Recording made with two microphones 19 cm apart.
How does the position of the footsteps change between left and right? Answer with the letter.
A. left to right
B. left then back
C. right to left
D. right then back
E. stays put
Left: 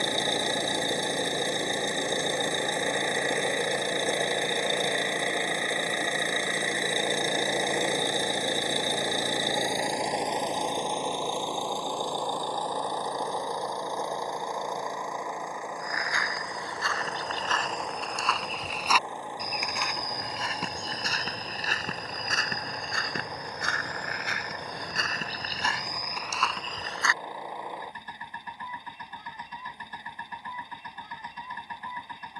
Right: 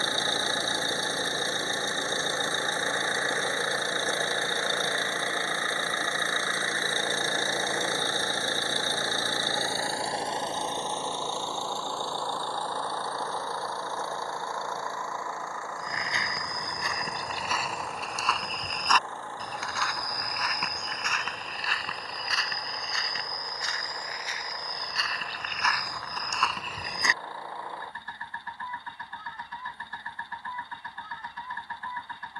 B.